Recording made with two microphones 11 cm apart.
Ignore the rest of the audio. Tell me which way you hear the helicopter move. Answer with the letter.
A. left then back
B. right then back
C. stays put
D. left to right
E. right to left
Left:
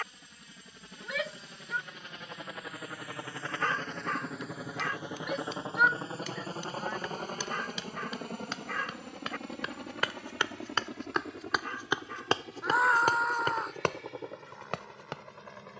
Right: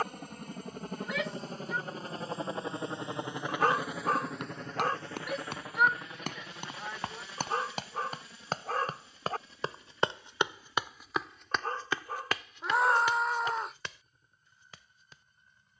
E.